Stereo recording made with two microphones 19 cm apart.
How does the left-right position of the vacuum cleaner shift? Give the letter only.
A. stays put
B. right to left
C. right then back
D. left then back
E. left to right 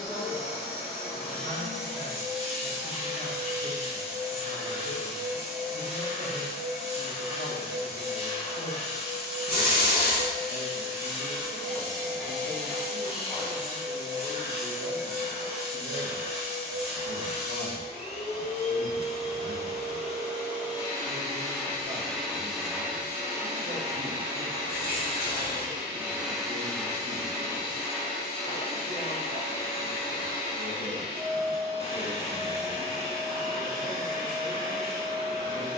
C.